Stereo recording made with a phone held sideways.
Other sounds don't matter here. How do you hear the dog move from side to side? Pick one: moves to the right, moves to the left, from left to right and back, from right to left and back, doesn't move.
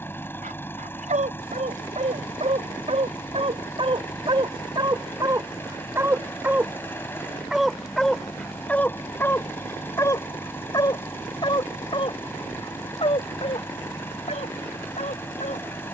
moves to the left.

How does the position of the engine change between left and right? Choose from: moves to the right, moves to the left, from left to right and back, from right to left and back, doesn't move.
doesn't move.